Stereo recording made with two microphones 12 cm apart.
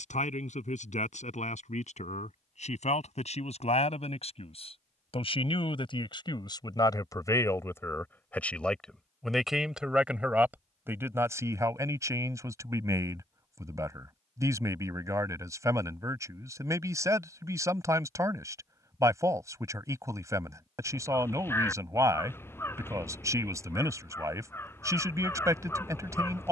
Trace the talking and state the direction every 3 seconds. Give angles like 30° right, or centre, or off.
70° left, 50° left, 30° left, 10° right, 20° right, 20° right, 20° right, 20° right, 20° right.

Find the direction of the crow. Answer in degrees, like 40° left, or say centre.
20° left.